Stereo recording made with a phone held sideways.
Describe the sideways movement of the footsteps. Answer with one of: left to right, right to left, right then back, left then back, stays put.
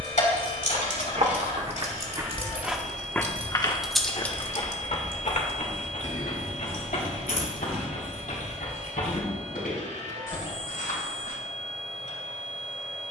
right to left.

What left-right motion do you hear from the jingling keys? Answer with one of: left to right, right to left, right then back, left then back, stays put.
right to left.